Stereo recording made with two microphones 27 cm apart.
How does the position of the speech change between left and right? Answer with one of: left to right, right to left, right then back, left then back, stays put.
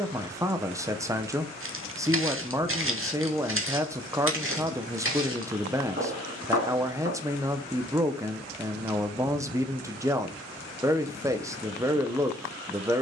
stays put.